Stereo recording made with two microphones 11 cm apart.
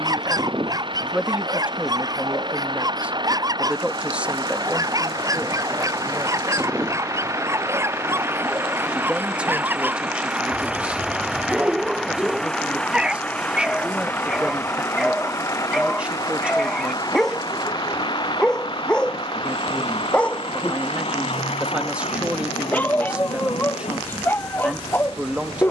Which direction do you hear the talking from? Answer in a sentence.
In this clip you hear the talking in the centre.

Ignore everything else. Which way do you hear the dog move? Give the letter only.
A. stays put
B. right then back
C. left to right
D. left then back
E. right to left
E.